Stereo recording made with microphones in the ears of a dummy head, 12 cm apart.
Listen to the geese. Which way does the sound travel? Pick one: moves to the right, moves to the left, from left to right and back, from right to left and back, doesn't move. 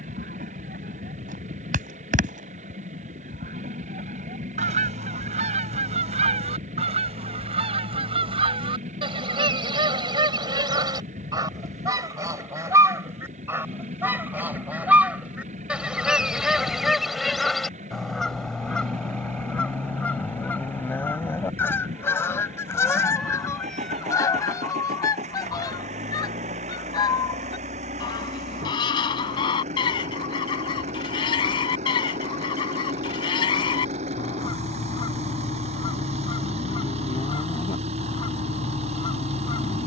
moves to the left.